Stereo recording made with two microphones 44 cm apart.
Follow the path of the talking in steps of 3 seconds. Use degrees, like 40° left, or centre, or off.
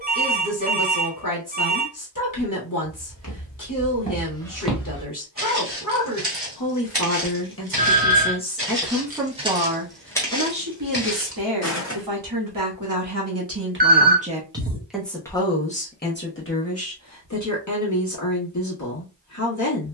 50° left, 50° left, 30° left, 30° right, 30° right, 30° left, 40° left.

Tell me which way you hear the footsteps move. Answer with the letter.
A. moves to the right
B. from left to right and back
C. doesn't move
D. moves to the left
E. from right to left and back
B.